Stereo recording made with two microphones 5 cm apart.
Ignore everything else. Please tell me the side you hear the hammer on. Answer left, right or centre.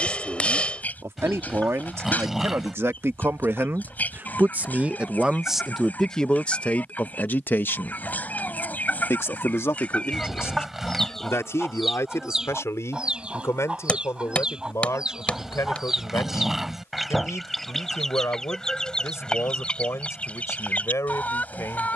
left.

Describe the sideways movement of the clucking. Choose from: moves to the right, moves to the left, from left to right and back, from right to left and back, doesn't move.
from left to right and back.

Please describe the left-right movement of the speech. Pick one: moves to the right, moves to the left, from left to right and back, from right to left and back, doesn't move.
moves to the left.